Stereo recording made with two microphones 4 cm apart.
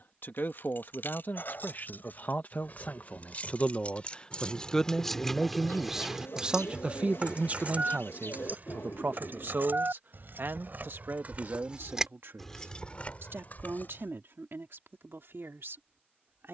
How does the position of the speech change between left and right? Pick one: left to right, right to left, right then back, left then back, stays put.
left to right.